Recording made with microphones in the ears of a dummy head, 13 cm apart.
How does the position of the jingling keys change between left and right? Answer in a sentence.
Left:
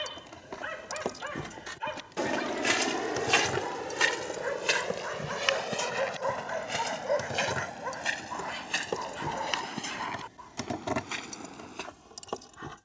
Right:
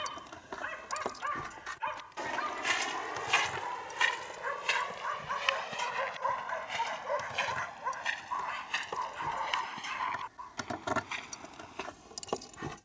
In this clip you hear the jingling keys go left and come back.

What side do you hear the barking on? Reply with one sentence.
You can hear the barking on the left.